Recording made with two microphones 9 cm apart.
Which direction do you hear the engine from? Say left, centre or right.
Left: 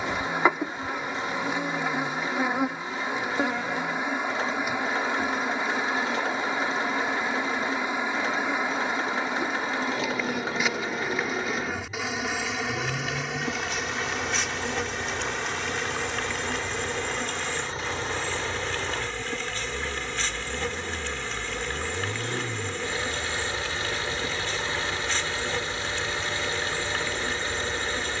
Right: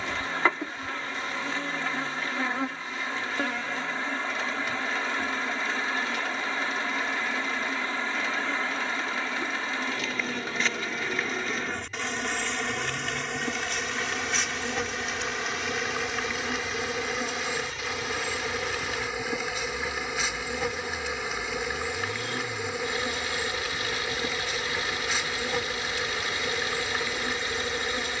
left.